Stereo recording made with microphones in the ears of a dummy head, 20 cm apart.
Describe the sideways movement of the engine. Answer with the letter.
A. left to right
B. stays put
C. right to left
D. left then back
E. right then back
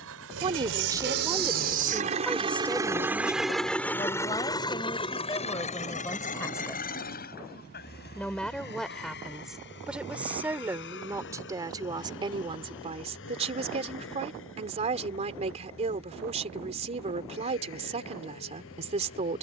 C.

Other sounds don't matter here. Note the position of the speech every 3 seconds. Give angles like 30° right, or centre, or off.
10° right, 20° left, 10° left, 10° right, 30° right, 30° right, 30° right.